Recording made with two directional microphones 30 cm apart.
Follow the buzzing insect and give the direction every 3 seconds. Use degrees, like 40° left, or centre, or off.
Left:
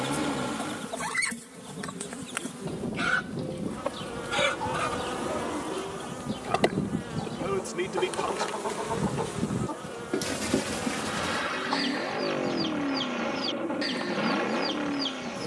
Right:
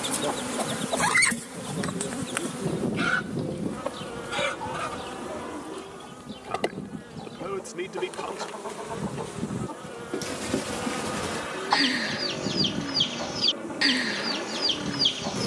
50° right, centre, 30° left, 10° right, 40° right.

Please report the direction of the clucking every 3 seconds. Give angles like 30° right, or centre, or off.
40° right, 10° left, 30° left, 10° left, 60° right.